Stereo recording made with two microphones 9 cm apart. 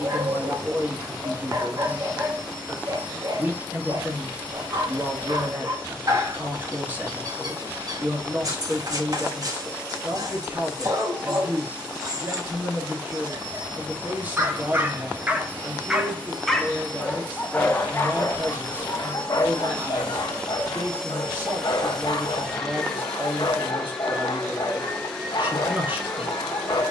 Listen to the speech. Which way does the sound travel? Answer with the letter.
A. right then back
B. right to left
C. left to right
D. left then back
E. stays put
E.